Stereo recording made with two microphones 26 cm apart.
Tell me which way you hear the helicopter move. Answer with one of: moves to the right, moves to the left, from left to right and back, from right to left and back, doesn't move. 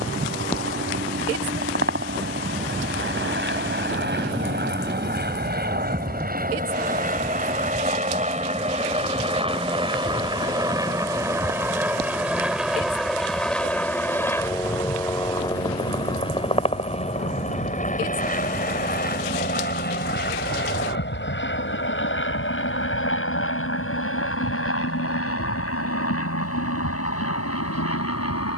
moves to the left.